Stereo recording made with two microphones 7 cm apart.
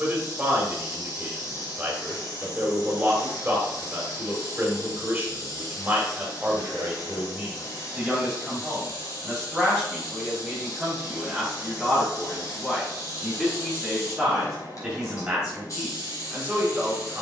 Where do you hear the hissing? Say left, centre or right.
left.